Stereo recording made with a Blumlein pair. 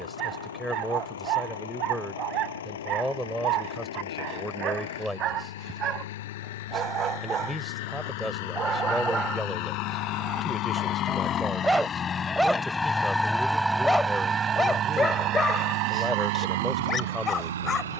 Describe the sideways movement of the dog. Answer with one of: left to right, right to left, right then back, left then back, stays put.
right to left.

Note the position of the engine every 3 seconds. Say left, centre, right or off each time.
left, left, left, left, centre, right.